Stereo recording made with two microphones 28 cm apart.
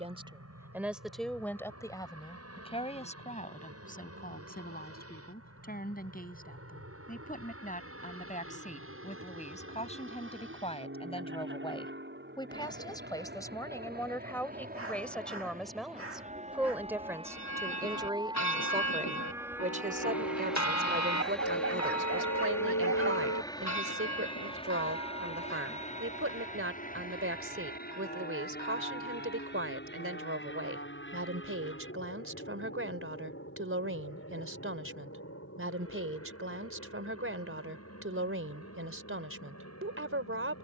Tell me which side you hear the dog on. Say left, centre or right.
right.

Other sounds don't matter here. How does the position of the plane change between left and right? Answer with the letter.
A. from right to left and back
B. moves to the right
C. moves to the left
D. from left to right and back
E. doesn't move
C.